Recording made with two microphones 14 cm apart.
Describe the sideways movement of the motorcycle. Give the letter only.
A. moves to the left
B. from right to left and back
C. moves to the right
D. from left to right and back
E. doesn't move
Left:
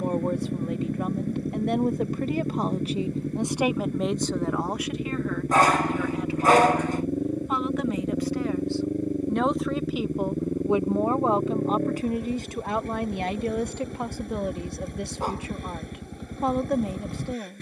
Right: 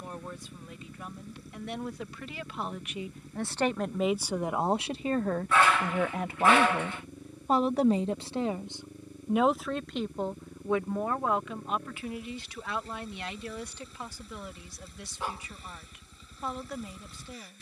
E.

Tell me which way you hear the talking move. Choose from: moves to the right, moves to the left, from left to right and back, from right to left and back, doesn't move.
from left to right and back.